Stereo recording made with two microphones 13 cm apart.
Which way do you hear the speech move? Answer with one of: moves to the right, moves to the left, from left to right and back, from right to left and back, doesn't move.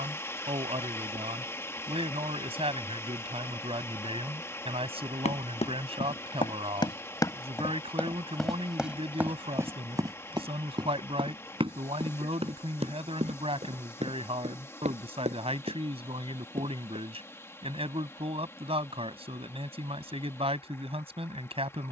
doesn't move.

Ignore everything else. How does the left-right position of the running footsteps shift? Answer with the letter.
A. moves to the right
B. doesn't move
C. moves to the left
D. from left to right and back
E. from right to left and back
A.